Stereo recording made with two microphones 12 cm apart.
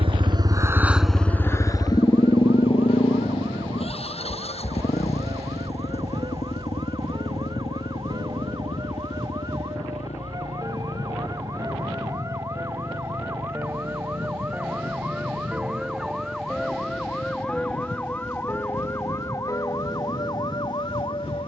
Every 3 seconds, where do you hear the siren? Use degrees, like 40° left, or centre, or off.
50° right, 40° right, 40° right, 30° right, 20° right, centre, 30° left.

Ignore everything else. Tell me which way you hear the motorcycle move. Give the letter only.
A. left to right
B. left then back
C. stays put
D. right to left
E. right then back
D.